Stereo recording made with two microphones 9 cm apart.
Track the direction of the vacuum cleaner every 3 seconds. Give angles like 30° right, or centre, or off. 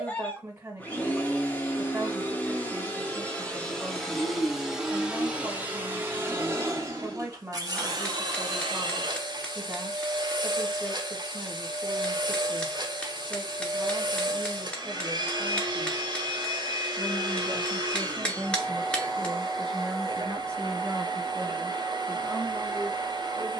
20° left, centre, 40° right, 50° right, 50° right, 50° right, 50° right, 50° right.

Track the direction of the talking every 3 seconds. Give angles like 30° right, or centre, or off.
30° right, 30° right, 30° right, 30° right, 30° right, 20° right, centre, 20° right.